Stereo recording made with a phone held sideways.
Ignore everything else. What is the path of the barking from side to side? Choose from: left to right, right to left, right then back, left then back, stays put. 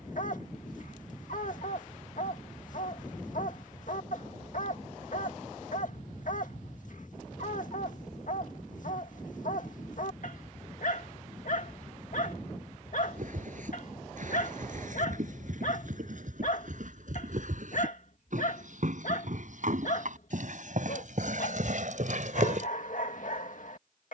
stays put.